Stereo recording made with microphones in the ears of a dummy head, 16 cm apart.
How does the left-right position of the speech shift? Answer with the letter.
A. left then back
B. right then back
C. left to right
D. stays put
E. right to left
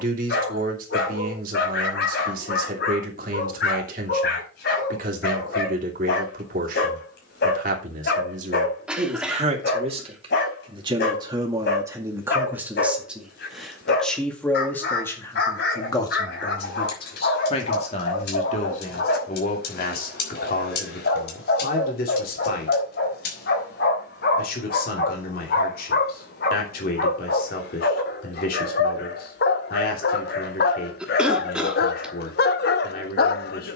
E.